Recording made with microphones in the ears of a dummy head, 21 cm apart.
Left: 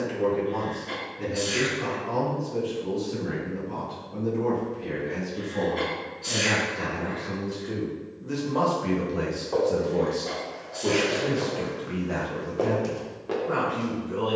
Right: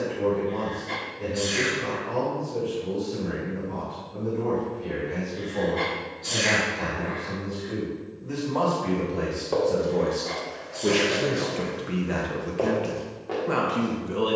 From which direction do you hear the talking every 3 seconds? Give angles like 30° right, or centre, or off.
50° left, 40° left, 30° left, 10° right, 50° right.